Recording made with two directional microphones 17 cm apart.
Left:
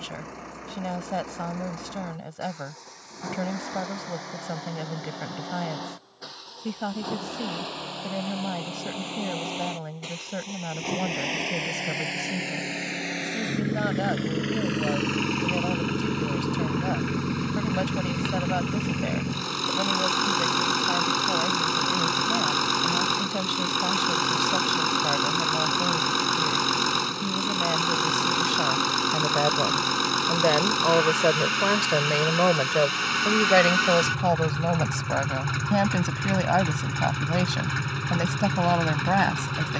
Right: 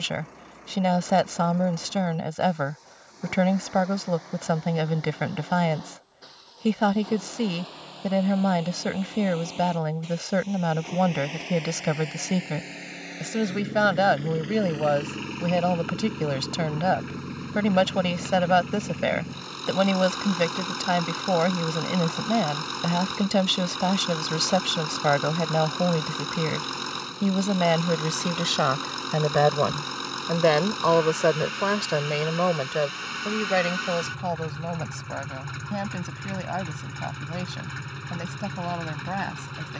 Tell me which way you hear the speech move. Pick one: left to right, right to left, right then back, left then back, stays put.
right to left.